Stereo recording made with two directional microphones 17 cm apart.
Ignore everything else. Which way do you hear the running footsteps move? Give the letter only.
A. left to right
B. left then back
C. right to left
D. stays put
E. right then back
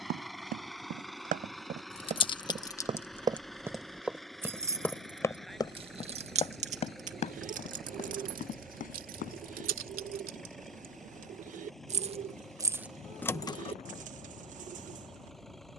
C.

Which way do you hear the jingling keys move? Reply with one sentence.
In this clip you hear the jingling keys go right and come back.